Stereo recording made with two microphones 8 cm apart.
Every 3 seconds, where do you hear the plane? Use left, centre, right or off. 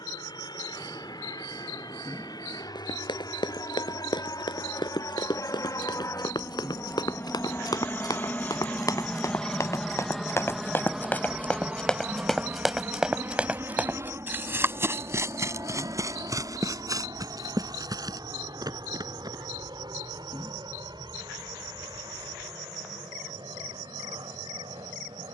left, left, left, centre, right, right, right, right, right.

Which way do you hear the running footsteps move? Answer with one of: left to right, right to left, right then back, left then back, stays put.
left to right.